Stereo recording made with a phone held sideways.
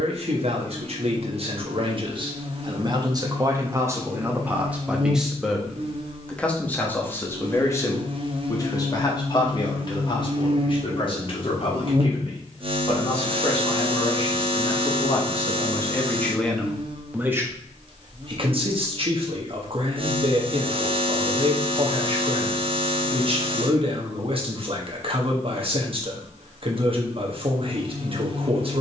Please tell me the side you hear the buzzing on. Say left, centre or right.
right.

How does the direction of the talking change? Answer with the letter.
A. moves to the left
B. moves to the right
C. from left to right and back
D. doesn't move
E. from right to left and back
E.